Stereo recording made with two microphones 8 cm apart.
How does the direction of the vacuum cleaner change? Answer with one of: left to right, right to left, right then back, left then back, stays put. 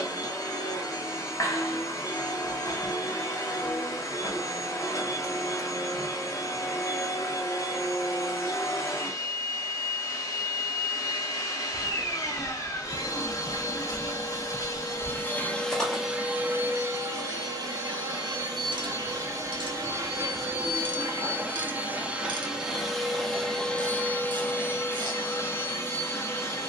right then back.